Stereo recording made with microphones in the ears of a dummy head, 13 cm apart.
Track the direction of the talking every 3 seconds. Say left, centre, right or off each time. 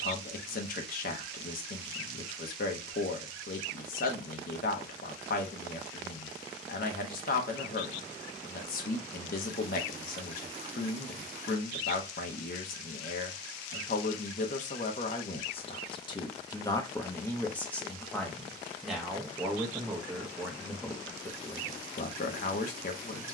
left, left, left, left, left, left, centre, left.